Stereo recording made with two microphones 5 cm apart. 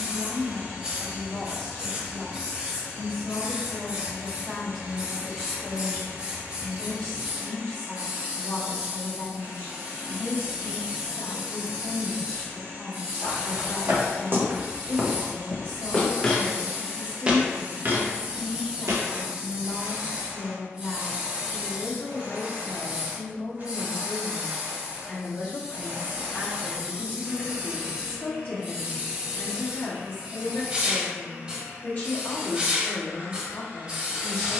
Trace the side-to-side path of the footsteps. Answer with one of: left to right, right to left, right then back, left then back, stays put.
left then back.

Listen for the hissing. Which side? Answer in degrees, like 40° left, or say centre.
20° right.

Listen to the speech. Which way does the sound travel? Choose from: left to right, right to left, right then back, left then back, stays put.
right to left.